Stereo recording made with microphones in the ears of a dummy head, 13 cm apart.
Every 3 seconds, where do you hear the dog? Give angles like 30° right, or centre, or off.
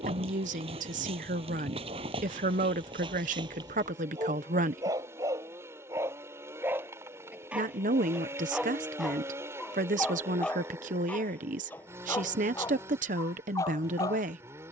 40° right, 30° right, 10° right, 10° left, 20° left.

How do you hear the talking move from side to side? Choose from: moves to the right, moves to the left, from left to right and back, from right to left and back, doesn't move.
doesn't move.